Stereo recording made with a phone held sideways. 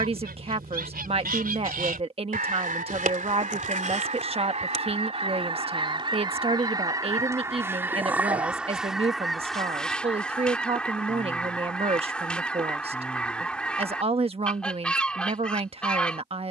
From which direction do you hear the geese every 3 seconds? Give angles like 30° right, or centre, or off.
60° right, 40° right, 20° right, 10° left, 10° left, 10° left.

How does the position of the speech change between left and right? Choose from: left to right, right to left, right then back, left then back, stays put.
stays put.